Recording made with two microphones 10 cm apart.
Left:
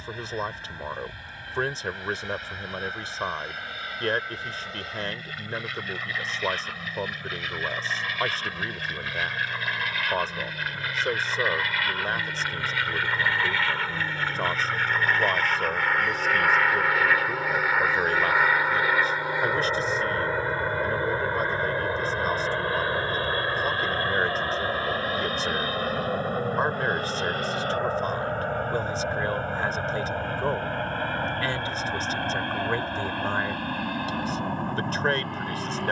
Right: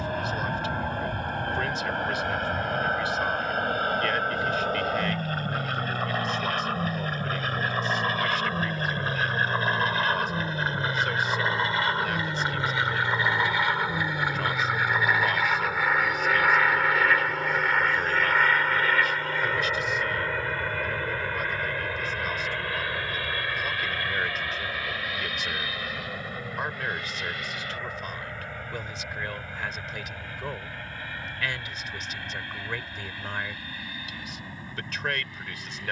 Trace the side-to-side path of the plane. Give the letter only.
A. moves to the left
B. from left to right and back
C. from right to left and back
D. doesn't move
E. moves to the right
A.